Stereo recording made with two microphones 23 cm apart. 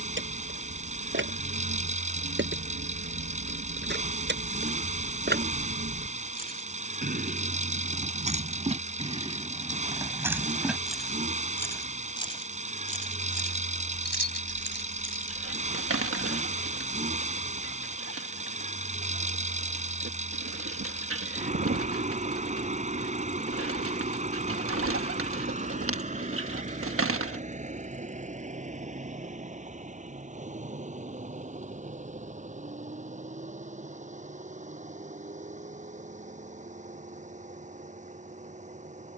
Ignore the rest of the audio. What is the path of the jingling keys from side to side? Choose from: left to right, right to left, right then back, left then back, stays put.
right to left.